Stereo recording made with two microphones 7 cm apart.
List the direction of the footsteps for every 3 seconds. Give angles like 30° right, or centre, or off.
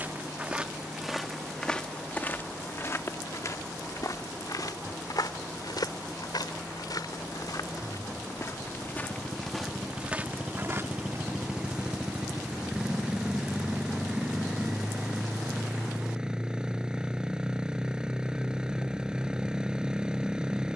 10° left, 60° left, 60° left, 10° right, off, off, off.